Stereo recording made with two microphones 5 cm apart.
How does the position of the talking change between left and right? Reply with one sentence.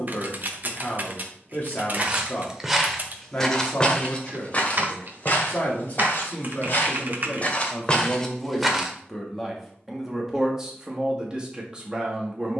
You can hear the talking travel towards the right.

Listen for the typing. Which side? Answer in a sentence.
In this clip you hear the typing on the right.